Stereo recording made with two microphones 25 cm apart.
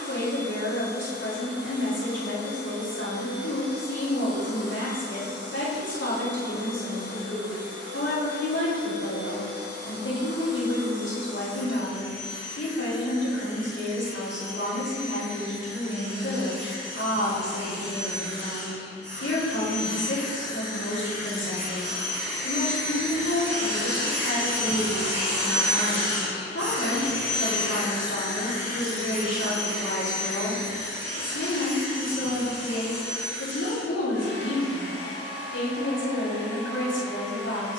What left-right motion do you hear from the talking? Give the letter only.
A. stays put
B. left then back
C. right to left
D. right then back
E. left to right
A.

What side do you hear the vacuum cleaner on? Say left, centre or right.
right.